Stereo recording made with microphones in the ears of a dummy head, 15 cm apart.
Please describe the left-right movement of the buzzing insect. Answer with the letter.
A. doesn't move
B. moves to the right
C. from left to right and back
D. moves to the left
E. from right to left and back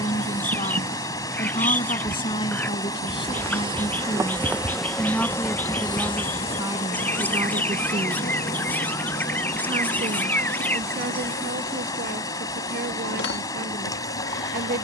D.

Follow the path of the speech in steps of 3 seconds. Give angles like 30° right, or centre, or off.
30° left, 20° left, 20° right, 50° right, 50° right.